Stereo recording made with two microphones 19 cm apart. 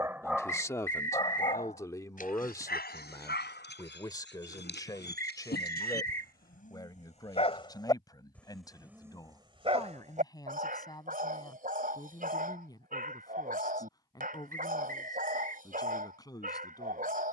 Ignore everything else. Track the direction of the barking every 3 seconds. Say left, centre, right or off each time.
left, left, left, right, right, right.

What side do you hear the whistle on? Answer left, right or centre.
right.